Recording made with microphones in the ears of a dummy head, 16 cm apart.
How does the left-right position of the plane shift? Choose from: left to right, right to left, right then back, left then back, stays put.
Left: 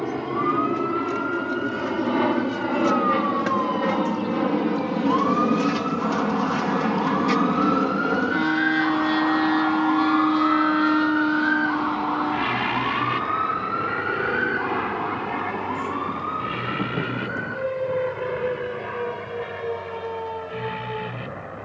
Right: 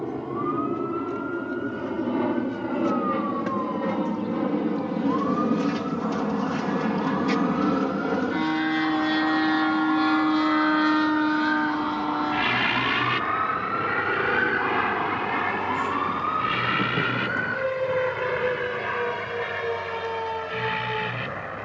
left to right.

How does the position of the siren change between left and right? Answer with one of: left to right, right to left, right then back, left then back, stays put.
left to right.